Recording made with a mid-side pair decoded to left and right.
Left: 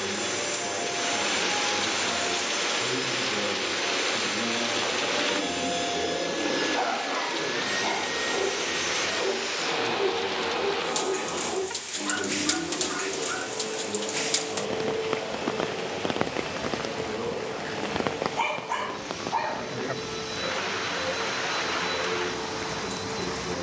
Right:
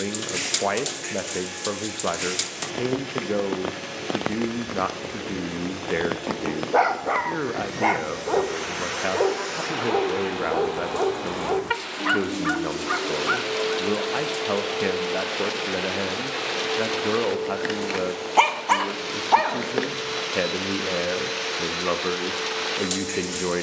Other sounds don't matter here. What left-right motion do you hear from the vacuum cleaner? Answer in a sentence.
In this clip you hear the vacuum cleaner travel towards the right.